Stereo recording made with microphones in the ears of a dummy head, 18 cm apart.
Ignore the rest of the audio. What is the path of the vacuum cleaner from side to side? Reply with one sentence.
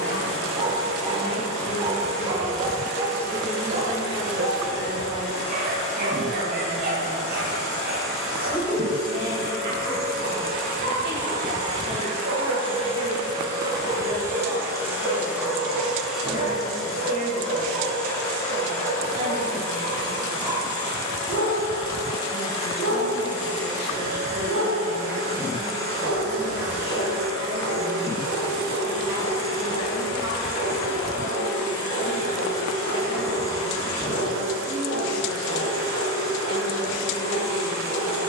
In this clip you hear the vacuum cleaner travel towards the left.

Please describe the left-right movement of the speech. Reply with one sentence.
You can hear the speech go from the left side to the right.